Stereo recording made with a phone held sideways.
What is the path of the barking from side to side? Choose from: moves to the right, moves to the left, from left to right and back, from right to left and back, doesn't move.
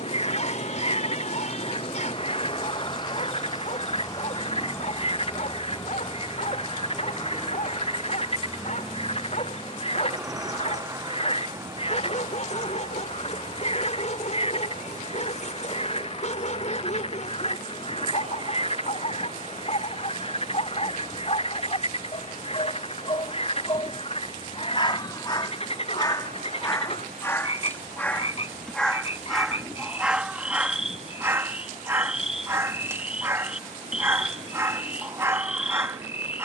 moves to the right.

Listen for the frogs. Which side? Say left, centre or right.
left.